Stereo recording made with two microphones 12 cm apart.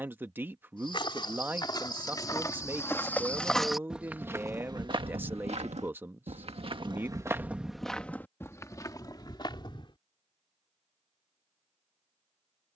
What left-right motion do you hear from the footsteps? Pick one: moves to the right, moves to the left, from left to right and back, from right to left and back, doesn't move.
from left to right and back.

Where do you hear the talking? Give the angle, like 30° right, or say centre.
20° right.